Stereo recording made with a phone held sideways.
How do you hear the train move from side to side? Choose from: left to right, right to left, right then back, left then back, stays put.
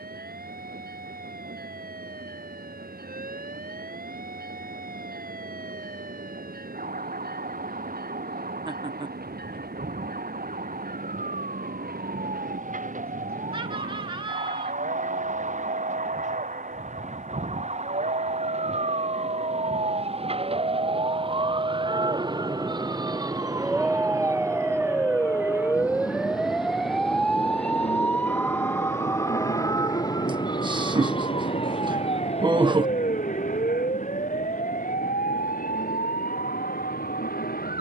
right to left.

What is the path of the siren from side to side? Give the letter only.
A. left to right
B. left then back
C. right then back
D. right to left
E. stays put
D.